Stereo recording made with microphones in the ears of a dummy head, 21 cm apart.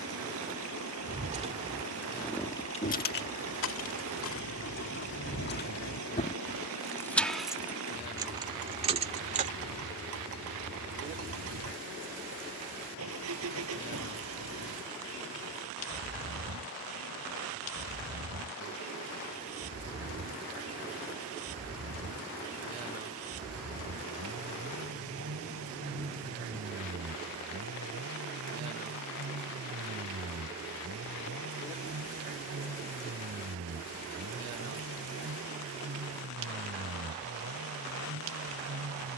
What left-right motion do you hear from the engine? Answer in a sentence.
In this clip you hear the engine stay in one place.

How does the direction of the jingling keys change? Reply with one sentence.
In this clip you hear the jingling keys move from right to left and back again.